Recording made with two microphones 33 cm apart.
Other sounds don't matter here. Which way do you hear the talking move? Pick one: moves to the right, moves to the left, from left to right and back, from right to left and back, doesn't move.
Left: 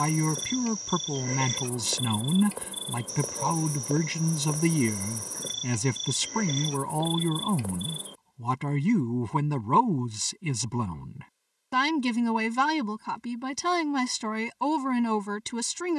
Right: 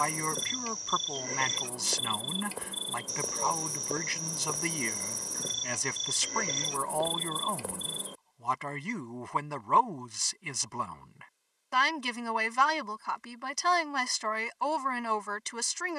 doesn't move.